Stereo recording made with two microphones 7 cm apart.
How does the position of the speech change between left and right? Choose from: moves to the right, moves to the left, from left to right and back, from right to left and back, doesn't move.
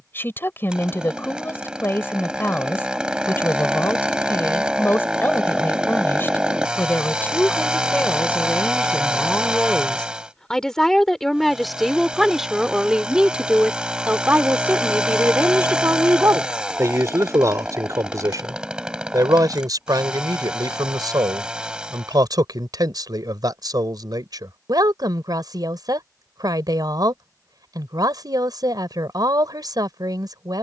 moves to the right.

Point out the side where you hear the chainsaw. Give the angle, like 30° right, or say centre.
10° right.